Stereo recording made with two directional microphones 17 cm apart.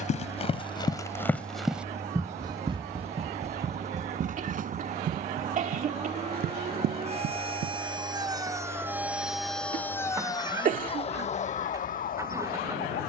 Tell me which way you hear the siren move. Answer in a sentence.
In this clip you hear the siren go from the right side to the left.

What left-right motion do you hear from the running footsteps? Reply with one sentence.
You can hear the running footsteps go from the left side to the right.